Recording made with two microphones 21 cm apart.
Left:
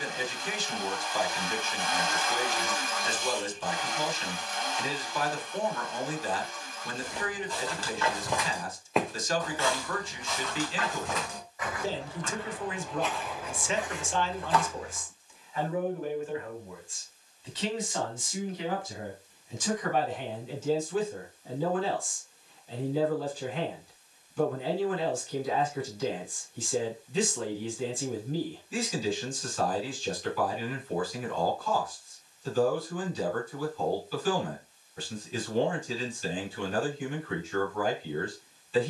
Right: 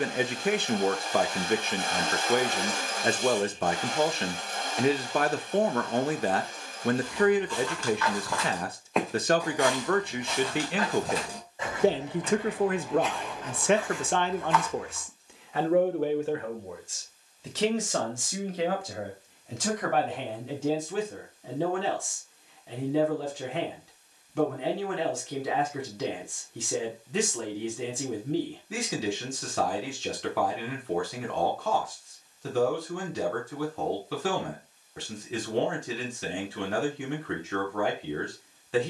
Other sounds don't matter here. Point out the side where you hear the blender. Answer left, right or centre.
right.